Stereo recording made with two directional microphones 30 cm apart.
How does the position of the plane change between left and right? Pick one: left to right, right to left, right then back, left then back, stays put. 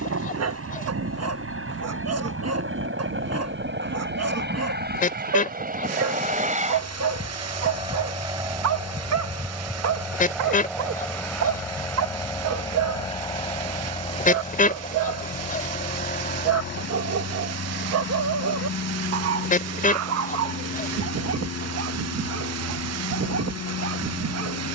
right to left.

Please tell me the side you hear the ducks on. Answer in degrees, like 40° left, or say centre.
30° left.